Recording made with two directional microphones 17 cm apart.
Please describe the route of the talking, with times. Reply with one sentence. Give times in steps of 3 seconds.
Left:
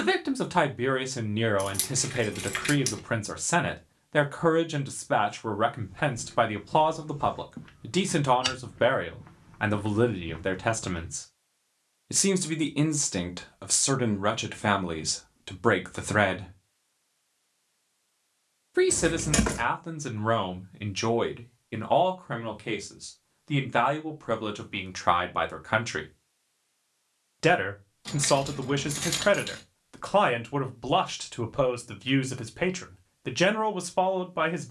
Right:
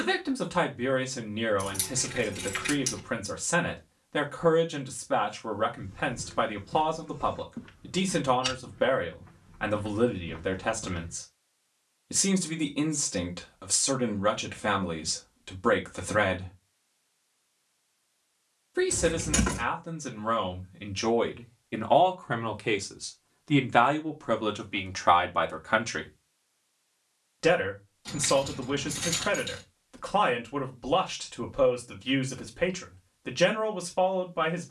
In this clip you hear the talking on the left from 0 s, in the centre from 21 s and on the left from 27 s.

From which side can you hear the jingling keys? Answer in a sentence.
You can hear the jingling keys on the left.